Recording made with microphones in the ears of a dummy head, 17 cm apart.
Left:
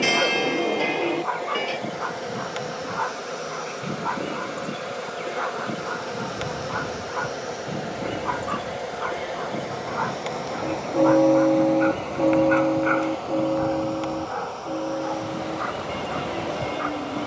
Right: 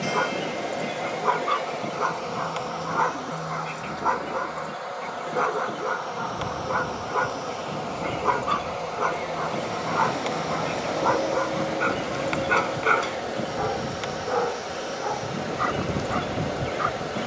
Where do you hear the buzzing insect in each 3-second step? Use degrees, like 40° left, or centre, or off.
centre, 30° left, 20° left, centre, 10° right, 20° right.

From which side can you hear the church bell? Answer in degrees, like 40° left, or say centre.
80° left.